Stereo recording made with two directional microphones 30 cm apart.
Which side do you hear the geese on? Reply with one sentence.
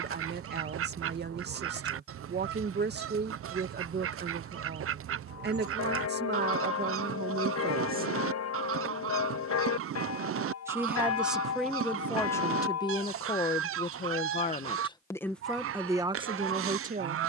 You can hear the geese on the right.